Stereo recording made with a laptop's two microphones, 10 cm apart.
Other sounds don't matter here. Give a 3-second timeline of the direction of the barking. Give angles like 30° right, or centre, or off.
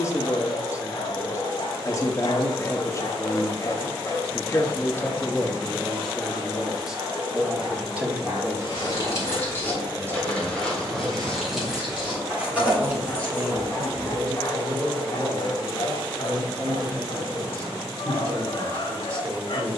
60° left, 20° left, 20° right, 20° right, 20° left, 50° left, 60° left.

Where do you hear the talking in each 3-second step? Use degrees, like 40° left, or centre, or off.
30° left, 20° left, 10° right, 30° right, 30° right, 30° right, 30° right.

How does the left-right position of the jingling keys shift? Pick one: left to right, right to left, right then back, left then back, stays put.
left to right.